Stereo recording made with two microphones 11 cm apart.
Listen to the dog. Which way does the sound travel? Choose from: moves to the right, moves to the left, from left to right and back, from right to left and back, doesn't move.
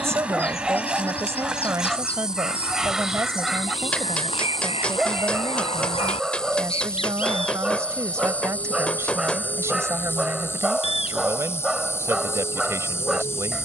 doesn't move.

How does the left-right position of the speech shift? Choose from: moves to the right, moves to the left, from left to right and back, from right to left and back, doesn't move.
doesn't move.